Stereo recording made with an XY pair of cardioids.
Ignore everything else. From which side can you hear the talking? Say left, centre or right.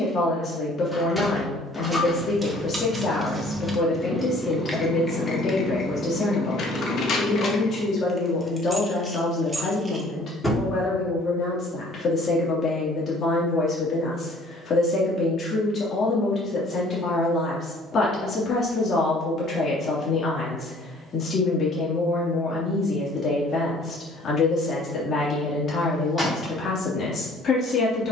left.